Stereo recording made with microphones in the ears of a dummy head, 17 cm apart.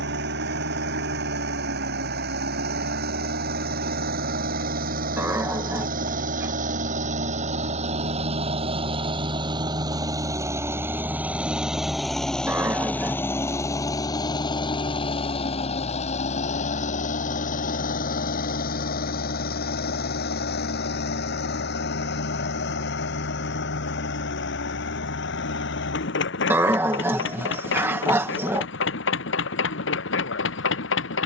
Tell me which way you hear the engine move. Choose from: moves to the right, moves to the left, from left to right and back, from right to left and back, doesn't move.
moves to the left.